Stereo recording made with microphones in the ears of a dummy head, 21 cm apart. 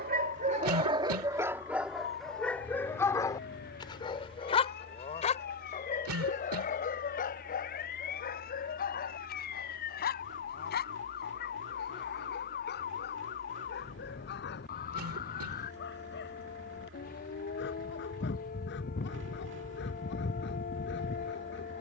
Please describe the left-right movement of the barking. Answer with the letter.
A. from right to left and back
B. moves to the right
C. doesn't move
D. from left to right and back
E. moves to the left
E.